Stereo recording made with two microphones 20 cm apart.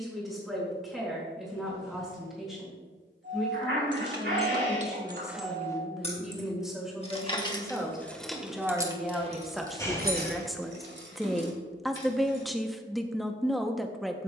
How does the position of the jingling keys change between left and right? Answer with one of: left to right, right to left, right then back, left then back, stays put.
left then back.